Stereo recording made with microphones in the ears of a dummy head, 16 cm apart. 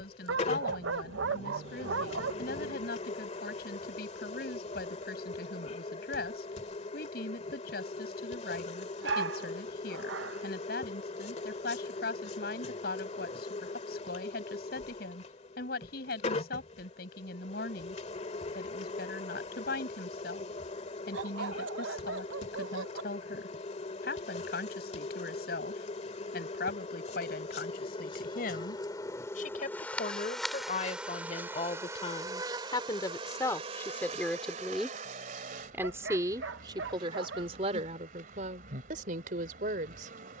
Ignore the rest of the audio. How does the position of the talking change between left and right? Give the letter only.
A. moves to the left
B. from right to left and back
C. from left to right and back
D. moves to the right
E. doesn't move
D.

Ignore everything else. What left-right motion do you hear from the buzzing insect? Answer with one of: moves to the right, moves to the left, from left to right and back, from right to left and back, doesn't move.
moves to the right.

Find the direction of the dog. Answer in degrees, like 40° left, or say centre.
70° right.